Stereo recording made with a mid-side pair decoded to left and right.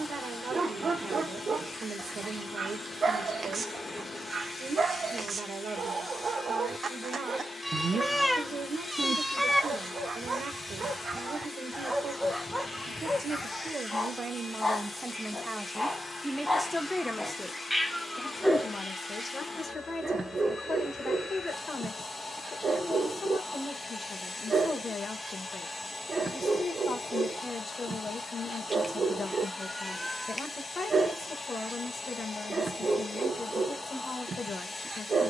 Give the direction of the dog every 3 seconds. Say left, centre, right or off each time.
right, right, right, right, centre, centre, right, right, right, right, right, right.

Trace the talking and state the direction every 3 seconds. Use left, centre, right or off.
right, right, right, right, right, centre, left, left, left, left, left, left.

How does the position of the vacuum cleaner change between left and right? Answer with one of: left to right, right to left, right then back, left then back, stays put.
stays put.